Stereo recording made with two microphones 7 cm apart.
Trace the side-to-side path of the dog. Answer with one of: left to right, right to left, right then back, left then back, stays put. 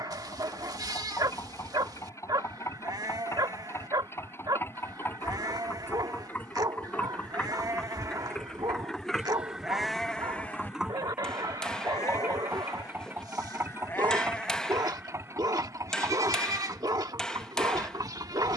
stays put.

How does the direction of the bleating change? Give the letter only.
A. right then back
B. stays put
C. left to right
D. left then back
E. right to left
D.